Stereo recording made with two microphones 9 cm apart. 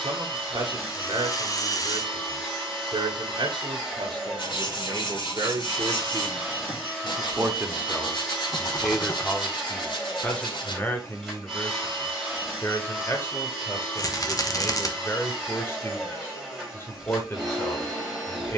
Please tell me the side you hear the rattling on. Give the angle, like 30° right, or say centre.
40° left.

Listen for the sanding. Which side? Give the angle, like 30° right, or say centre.
70° left.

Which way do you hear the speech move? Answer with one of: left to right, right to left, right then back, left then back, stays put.
right to left.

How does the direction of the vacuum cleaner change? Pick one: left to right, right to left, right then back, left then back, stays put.
stays put.